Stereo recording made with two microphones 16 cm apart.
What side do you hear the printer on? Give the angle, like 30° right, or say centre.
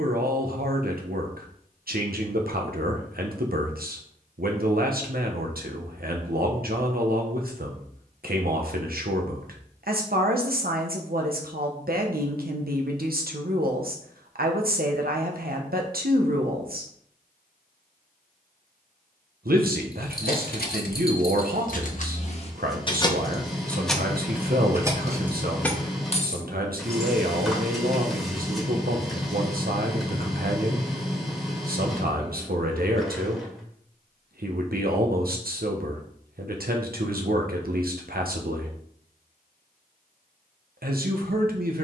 centre.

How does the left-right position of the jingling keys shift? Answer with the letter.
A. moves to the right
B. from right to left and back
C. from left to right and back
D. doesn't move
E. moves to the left
C.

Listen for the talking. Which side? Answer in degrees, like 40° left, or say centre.
70° right.